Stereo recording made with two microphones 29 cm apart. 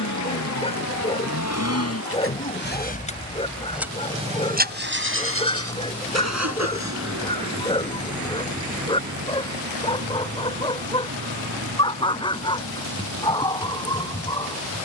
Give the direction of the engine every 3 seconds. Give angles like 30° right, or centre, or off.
50° left, 20° right, 60° right, 70° right, 80° right.